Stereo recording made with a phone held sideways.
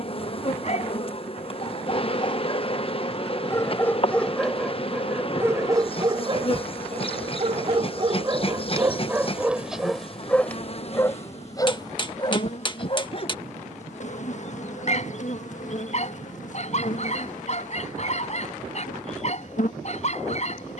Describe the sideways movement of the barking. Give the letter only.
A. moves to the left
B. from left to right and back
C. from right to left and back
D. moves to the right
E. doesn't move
B.